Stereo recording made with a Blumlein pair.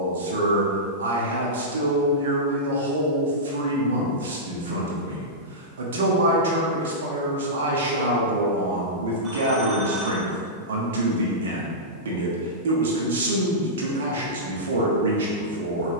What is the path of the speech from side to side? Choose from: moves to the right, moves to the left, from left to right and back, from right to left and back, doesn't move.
doesn't move.